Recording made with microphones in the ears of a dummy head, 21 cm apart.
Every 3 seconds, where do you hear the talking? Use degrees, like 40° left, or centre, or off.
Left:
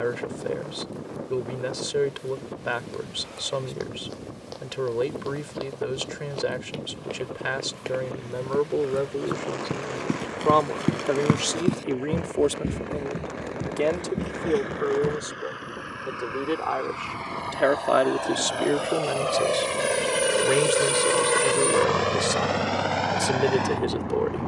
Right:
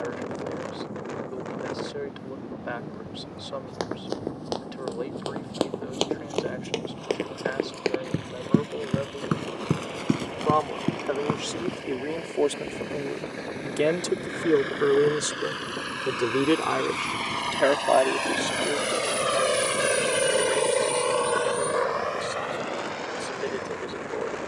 70° left, 70° left, 70° left, 40° left, 10° right, 30° right, 50° left, 60° left.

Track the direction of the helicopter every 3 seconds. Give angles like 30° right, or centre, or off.
70° right, 70° right, 70° right, 70° right, 60° right, 50° right, 20° right, 50° left.